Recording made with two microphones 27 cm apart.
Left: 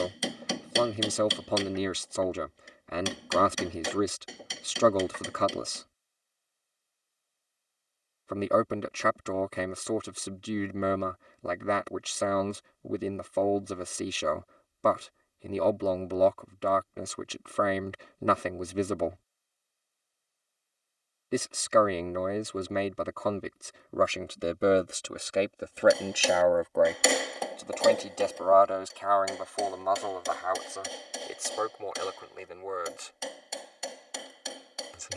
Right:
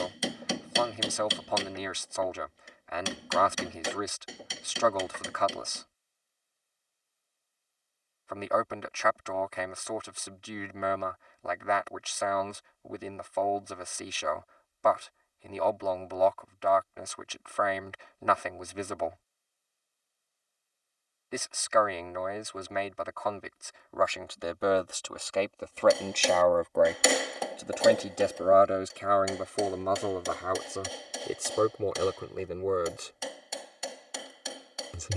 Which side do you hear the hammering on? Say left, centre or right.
centre.